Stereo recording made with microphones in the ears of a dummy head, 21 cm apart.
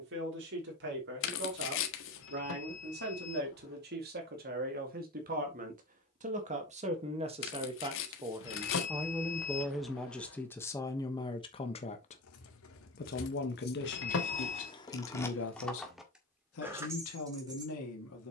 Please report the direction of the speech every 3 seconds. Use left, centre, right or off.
right, right, right, centre, left, left.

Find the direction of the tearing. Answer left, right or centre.
left.